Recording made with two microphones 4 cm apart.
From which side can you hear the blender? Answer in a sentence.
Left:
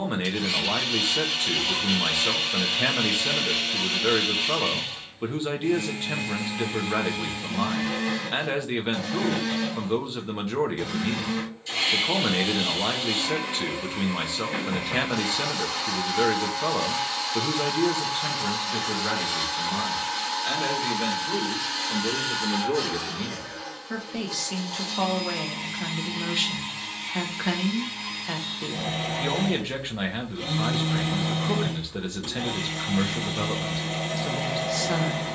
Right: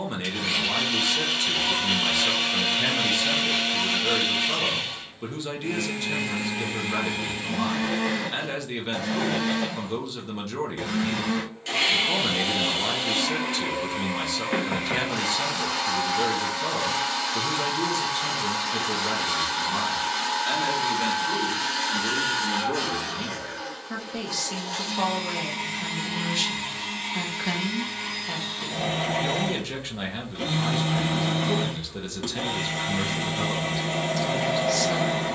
You can hear the blender on the right.